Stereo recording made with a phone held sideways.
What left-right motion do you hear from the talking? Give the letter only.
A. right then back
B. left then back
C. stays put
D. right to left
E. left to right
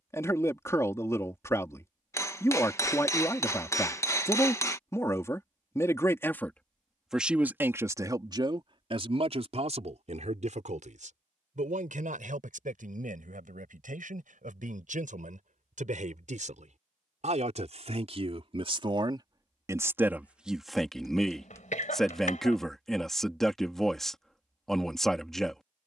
A.